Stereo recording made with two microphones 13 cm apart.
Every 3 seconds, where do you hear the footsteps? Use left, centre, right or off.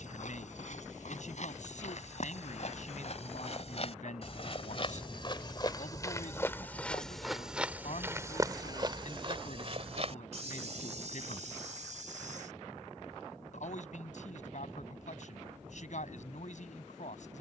left, left, centre, right, right, off.